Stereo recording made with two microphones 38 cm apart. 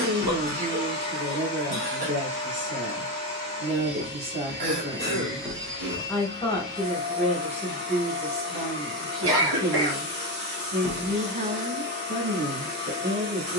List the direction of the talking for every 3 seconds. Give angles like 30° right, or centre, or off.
30° right, 20° right, 10° right, 30° right, 30° right.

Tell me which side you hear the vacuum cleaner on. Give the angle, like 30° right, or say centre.
30° right.